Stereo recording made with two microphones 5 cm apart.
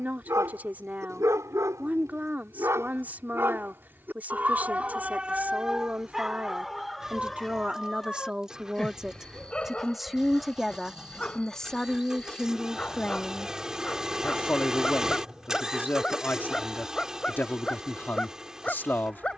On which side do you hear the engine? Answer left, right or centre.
centre.